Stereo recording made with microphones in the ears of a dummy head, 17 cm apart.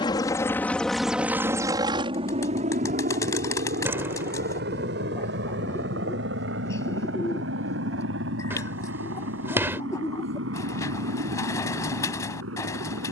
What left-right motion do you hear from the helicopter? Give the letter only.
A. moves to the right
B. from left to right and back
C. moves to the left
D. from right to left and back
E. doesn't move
A.